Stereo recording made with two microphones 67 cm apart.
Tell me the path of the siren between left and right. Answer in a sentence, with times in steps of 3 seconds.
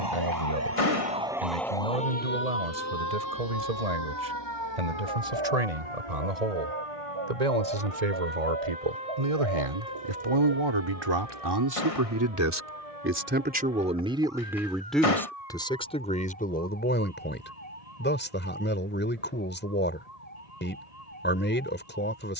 You can hear the siren in the centre from 0 s and on the left from 3 s.